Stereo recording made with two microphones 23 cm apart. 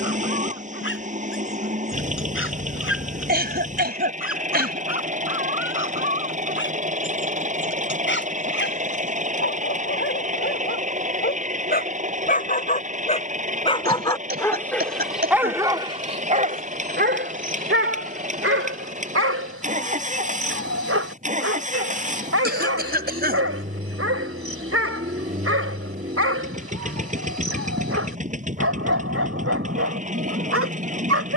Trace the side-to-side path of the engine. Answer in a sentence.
In this clip you hear the engine stay put.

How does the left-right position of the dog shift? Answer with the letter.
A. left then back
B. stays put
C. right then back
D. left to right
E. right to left
D.